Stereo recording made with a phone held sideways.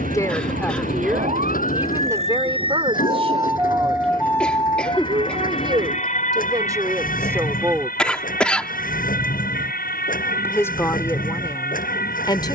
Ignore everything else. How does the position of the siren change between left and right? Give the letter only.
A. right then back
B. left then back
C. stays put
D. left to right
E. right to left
E.